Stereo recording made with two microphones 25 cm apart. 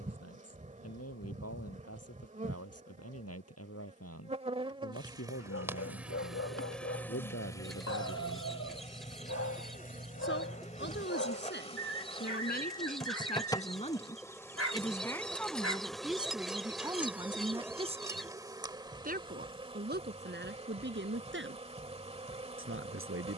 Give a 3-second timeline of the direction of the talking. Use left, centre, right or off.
left, left, left, left, left, centre, right, right.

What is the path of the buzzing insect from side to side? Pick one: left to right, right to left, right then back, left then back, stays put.
left then back.